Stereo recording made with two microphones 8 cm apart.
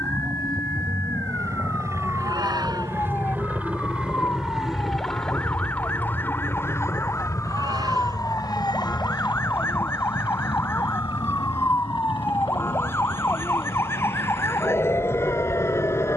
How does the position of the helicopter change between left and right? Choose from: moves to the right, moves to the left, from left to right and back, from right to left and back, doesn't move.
moves to the left.